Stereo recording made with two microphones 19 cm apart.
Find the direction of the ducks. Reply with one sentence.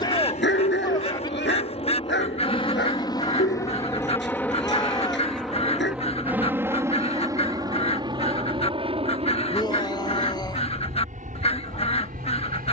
In this clip you hear the ducks on the left.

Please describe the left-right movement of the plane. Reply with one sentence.
You can hear the plane move from left to right.